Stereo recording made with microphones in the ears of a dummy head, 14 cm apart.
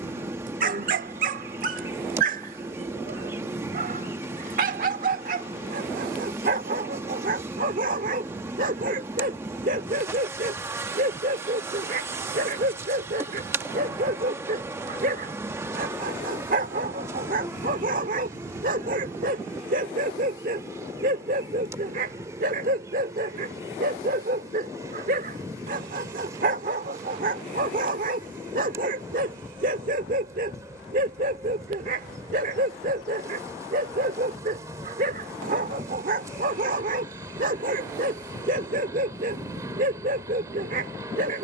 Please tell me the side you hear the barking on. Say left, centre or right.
right.